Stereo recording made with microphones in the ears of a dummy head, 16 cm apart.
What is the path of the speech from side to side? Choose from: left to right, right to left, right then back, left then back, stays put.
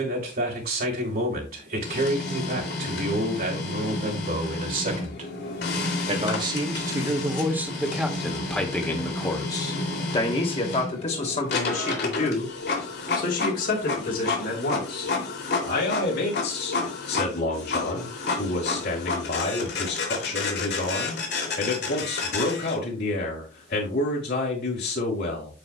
right to left.